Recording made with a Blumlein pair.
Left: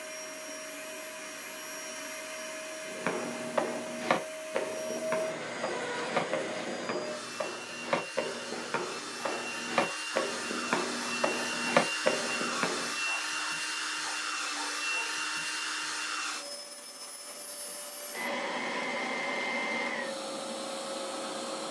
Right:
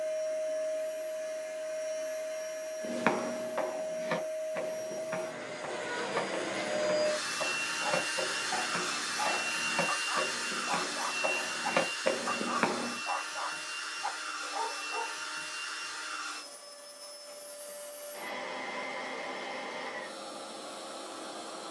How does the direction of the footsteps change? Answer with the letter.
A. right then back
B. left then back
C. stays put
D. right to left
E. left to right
B.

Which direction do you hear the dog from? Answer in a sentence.
You can hear the dog on the right.